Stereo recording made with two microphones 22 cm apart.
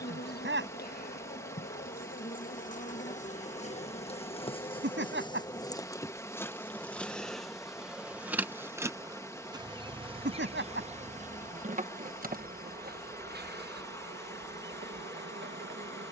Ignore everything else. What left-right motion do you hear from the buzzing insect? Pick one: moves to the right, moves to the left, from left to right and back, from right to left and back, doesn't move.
moves to the right.